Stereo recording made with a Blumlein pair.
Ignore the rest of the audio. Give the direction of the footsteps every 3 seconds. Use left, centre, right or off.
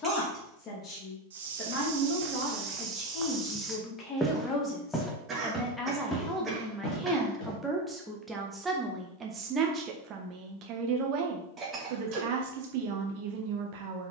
right, centre, left, off, off.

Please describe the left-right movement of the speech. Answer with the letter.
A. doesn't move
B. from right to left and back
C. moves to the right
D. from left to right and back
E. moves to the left
C.